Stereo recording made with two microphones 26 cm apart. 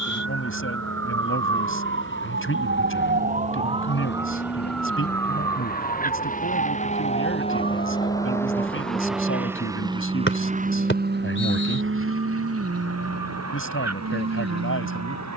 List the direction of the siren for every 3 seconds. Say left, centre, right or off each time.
right, centre, left, left, left.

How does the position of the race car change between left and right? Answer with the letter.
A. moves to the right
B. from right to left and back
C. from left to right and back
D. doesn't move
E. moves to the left
A.